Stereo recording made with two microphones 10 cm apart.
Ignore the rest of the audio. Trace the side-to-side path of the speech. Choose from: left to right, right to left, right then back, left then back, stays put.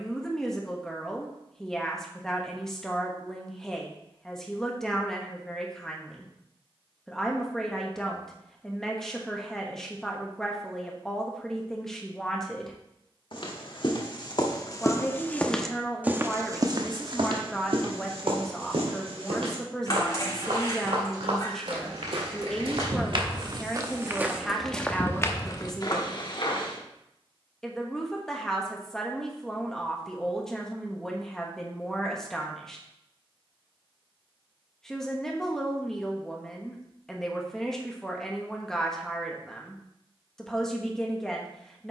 stays put.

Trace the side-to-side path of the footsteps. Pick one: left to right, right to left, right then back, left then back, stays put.
right then back.